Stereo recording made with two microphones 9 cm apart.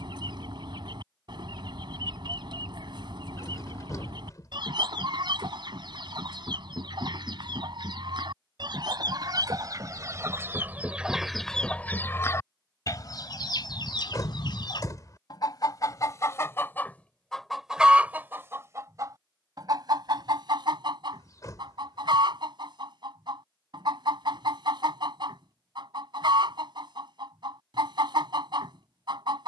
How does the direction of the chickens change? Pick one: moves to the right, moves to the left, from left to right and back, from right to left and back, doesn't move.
from right to left and back.